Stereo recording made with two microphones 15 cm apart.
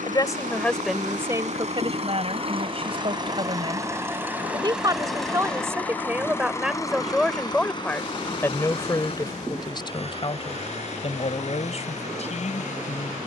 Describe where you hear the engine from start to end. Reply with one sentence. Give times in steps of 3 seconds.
You can hear the engine on the right from 0 s, in the centre from 3 s and on the left from 6 s.